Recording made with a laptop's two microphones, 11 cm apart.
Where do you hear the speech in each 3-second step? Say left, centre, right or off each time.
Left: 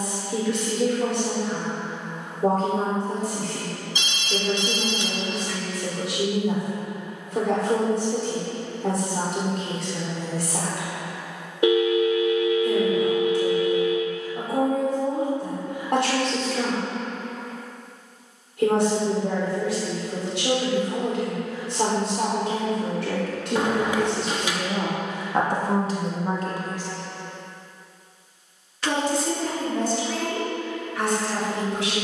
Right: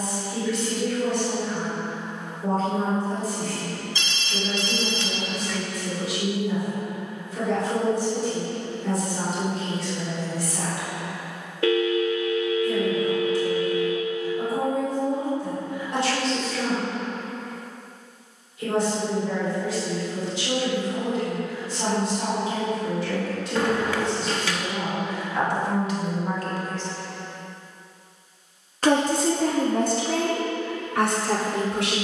left, left, left, left, left, left, left, left, left, right, right.